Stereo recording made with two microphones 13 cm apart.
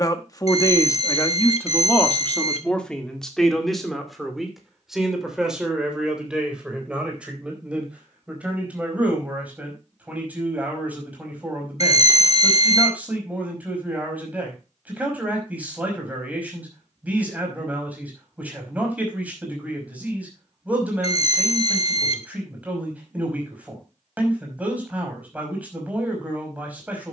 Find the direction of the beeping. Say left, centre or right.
left.